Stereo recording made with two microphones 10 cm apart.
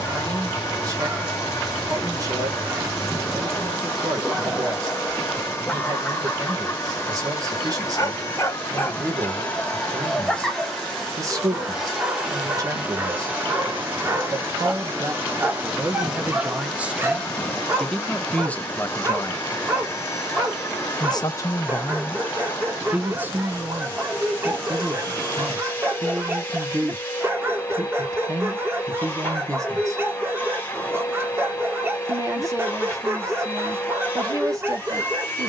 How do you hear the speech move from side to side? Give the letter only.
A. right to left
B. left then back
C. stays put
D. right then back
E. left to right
B.